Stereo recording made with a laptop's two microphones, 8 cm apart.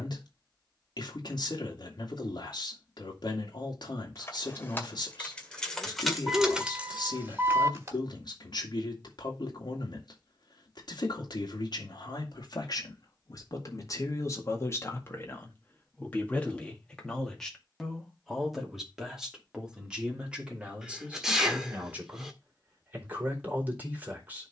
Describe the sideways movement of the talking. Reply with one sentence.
In this clip you hear the talking move to the right.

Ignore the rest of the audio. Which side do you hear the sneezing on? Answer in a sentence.
You can hear the sneezing in the centre.